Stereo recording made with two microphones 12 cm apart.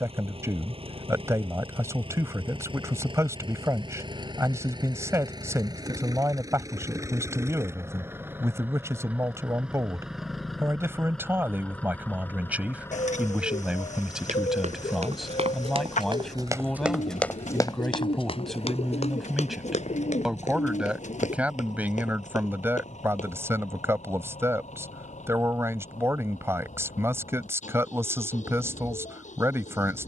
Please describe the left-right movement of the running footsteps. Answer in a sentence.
In this clip you hear the running footsteps go from the right side to the left.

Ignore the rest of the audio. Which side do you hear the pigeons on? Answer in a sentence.
You can hear the pigeons on the left.